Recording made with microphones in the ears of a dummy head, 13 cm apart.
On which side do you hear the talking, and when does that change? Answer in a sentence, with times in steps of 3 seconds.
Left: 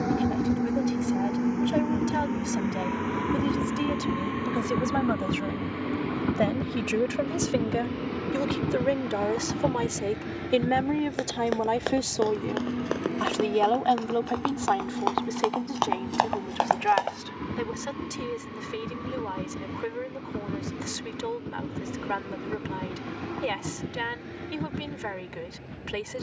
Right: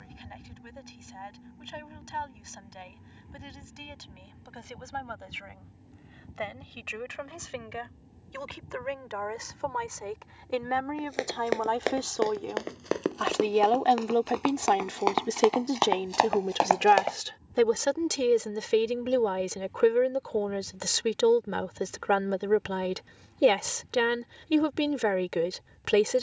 In this clip you hear the talking on the left from 0 s, in the centre from 12 s and on the right from 15 s.